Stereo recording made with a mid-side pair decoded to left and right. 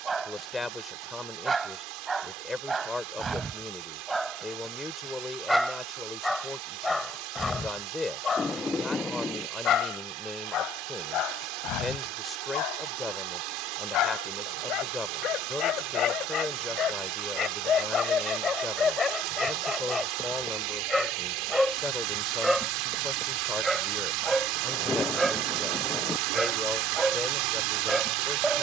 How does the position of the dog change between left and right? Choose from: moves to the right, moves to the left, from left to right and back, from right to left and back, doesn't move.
from right to left and back.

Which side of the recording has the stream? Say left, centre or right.
right.